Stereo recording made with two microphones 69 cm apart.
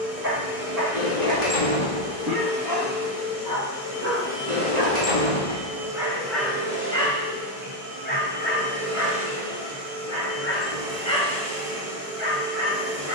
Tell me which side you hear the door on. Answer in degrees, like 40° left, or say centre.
50° left.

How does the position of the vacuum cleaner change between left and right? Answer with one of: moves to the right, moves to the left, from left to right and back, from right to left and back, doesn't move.
moves to the right.